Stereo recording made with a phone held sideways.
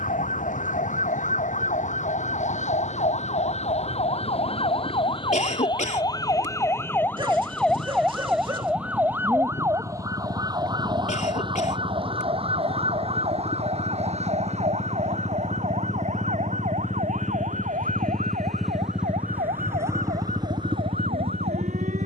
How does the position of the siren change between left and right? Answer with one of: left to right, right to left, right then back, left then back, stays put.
left to right.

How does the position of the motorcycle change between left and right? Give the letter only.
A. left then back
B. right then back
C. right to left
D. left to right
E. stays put
D.